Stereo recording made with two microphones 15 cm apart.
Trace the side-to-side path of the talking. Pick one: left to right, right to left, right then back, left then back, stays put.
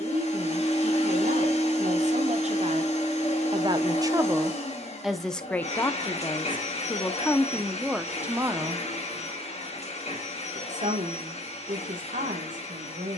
left then back.